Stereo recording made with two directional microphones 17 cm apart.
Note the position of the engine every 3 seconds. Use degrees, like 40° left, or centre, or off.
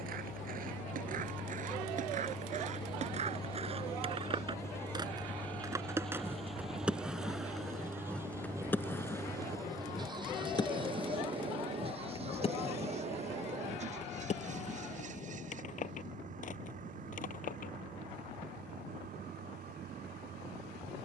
40° left, 10° left, 10° right, 30° right, 40° right, 50° right, 50° right.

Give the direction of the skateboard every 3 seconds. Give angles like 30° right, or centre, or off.
50° right, 30° right, centre, 20° left, 40° left, 50° left, off.